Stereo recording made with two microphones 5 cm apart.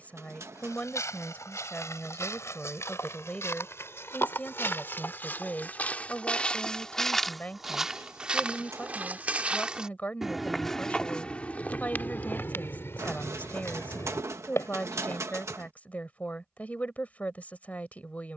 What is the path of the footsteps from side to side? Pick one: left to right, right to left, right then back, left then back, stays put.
right then back.